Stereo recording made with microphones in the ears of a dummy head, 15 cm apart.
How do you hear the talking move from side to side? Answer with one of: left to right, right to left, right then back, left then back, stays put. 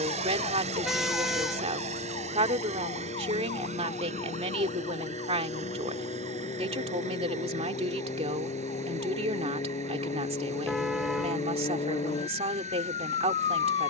stays put.